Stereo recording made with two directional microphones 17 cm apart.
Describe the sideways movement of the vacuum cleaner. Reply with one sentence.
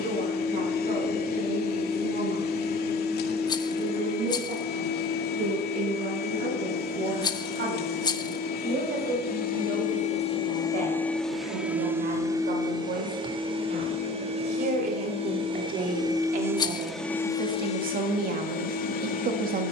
In this clip you hear the vacuum cleaner go right and come back.